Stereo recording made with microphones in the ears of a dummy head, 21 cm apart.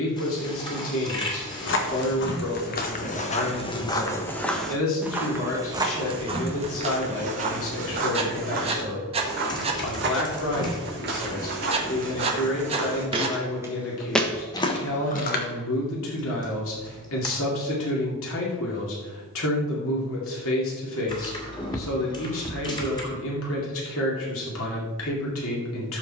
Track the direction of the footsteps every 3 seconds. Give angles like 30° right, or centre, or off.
50° left, 10° left, 30° right, 50° right, 10° right, 40° left, off, off, off.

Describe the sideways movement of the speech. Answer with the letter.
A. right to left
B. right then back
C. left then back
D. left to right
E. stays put
E.